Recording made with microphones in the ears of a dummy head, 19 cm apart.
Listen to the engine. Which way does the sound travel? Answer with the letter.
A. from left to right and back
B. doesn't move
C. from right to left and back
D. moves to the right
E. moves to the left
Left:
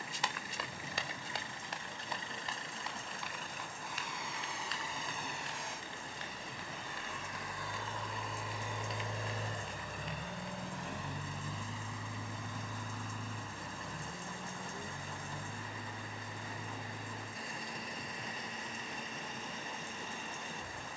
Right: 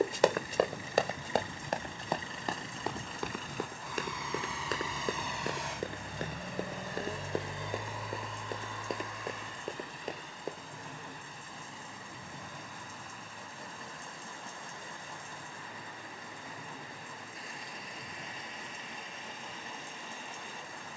E.